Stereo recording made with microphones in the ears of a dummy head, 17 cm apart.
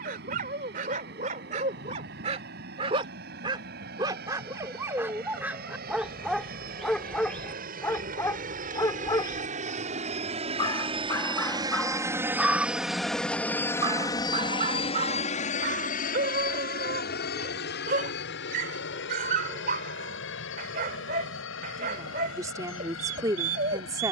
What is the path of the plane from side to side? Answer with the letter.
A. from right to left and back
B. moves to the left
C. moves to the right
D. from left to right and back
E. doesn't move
B.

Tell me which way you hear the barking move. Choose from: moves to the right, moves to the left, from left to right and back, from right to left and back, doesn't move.
from right to left and back.